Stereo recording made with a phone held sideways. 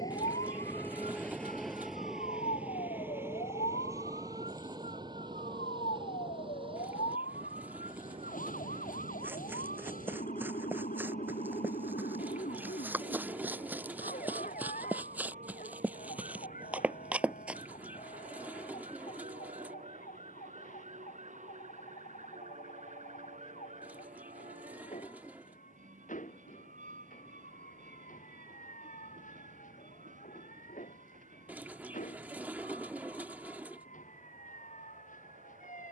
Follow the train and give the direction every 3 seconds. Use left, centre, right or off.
centre, right, right, right, right, right, right, right, right, right, right, right.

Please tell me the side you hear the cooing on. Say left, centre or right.
centre.